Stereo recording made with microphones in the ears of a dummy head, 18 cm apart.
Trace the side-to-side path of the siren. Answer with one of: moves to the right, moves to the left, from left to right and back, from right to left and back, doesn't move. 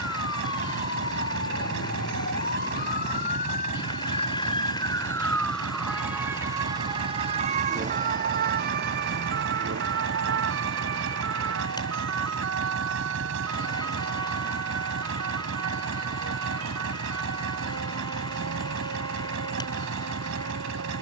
moves to the right.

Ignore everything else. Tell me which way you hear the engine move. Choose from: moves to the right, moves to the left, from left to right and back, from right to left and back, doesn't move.
doesn't move.